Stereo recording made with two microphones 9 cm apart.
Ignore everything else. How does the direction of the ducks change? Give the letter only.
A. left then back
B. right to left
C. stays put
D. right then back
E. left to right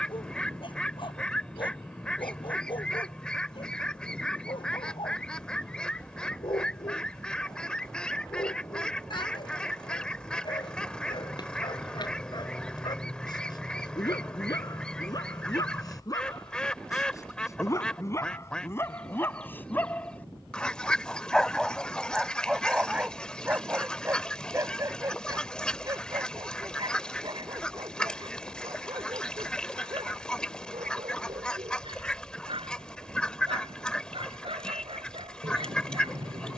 C.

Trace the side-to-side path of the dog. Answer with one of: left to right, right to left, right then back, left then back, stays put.
left to right.